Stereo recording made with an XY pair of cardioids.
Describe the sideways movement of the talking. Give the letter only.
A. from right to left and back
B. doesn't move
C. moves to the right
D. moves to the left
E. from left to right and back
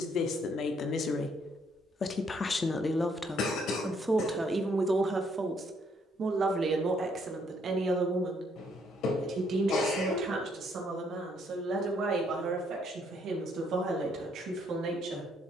C.